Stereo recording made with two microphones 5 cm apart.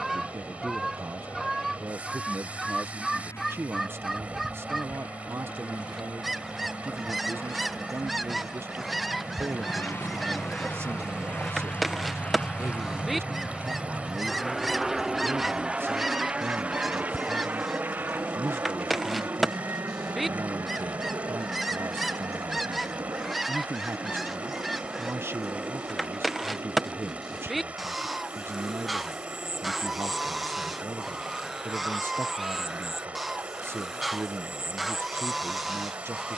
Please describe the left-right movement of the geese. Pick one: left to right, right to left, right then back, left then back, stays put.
stays put.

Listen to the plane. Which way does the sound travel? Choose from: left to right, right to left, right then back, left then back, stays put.
left to right.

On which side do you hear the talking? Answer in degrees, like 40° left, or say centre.
50° right.